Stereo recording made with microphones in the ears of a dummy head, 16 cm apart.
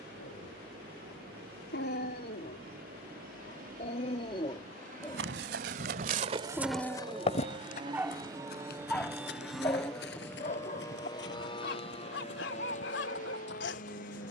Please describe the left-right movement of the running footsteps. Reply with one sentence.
In this clip you hear the running footsteps go from the right side to the left.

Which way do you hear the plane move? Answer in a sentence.
In this clip you hear the plane go from the right side to the left.